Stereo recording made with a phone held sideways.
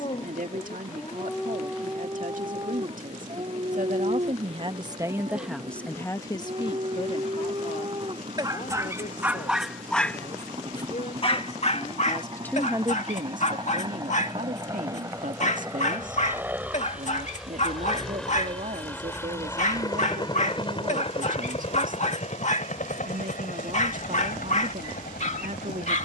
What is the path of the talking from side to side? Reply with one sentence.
In this clip you hear the talking go left and come back.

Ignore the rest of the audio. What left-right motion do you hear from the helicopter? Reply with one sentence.
You can hear the helicopter travel towards the left.